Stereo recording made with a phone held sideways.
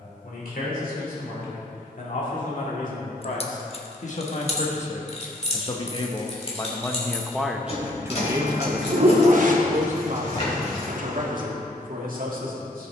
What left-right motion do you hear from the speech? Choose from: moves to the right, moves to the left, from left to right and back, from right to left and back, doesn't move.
moves to the right.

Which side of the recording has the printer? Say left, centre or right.
right.